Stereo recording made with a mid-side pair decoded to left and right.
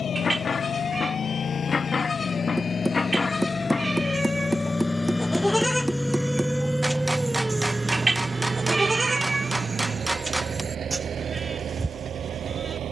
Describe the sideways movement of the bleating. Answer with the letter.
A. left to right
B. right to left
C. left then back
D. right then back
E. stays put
A.